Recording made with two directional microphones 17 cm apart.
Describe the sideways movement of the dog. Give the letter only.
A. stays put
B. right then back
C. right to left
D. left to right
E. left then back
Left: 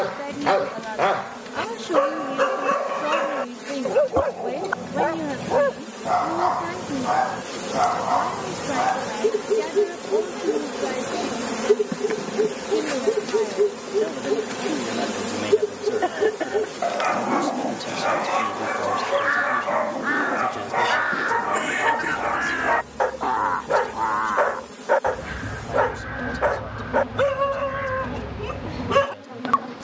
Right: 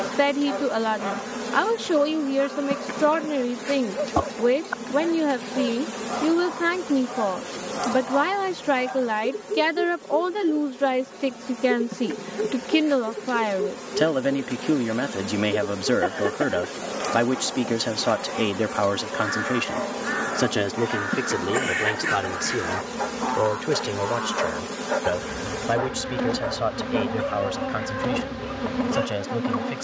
A.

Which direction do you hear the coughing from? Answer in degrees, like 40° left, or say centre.
10° left.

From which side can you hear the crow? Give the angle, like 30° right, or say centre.
60° left.